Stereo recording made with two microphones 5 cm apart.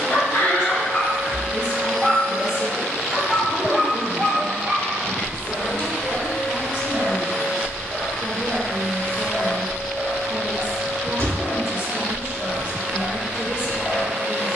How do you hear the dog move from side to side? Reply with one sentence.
In this clip you hear the dog go right and come back.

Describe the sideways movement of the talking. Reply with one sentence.
You can hear the talking stay put.